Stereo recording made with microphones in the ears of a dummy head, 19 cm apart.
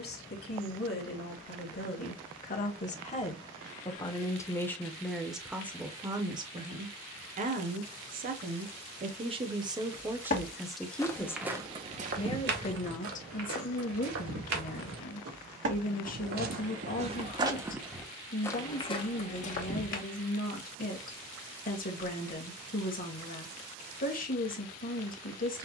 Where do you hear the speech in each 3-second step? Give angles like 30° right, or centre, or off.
50° left, 10° left, 30° right, 10° right, 40° left, 40° left, 40° left, 40° left, 40° left.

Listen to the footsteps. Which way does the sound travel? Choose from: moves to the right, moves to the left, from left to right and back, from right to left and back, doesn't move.
from left to right and back.